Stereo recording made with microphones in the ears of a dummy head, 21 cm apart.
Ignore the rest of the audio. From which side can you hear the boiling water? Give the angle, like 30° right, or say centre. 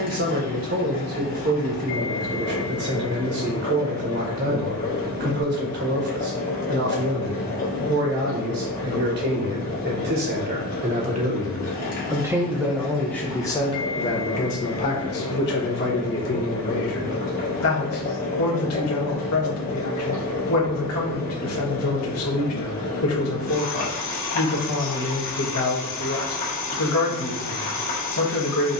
40° left.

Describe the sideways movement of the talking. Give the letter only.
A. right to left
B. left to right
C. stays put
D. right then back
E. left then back
A.